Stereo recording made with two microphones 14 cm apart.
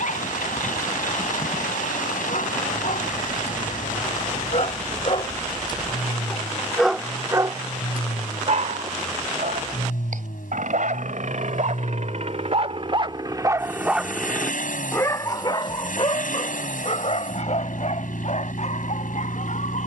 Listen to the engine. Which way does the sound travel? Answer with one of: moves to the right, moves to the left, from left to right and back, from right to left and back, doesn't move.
doesn't move.